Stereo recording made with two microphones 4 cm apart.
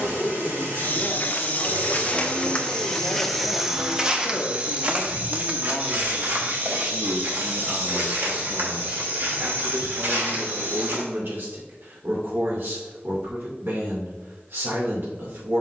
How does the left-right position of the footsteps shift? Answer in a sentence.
In this clip you hear the footsteps move to the right.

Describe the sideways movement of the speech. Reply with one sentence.
In this clip you hear the speech go from the left side to the right.